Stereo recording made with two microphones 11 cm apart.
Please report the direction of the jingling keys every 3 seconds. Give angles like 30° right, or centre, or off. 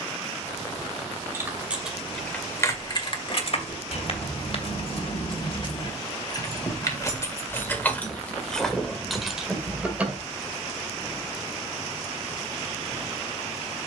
10° left, 50° left, 20° left, 10° right, off.